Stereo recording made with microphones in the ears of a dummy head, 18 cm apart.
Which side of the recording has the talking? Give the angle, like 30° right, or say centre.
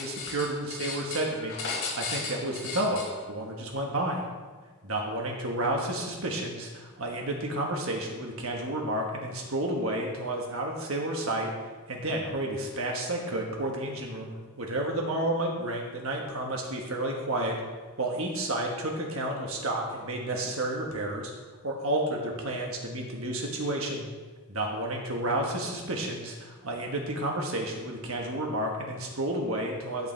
70° right.